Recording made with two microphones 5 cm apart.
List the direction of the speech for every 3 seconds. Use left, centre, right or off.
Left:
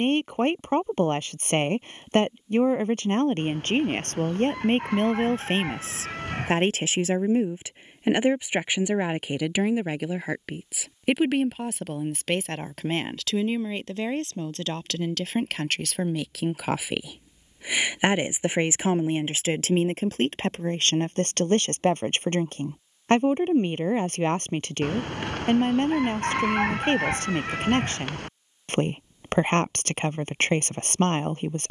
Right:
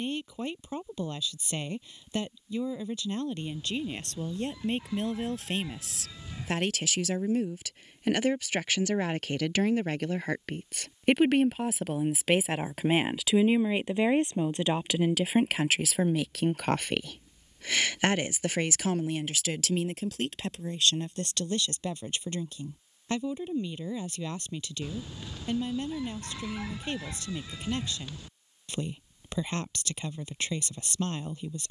left, left, left, centre, centre, centre, left, left, left, left, left.